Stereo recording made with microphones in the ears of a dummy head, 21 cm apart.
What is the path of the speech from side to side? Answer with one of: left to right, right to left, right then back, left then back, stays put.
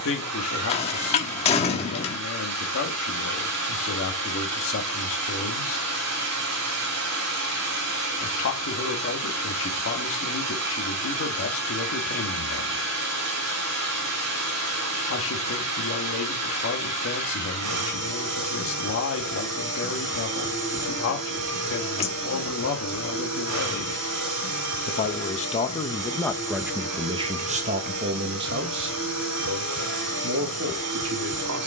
left to right.